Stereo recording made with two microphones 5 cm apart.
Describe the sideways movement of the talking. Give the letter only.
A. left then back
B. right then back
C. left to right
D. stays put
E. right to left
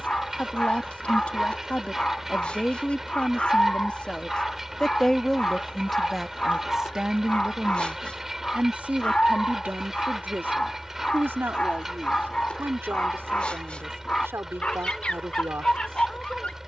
C.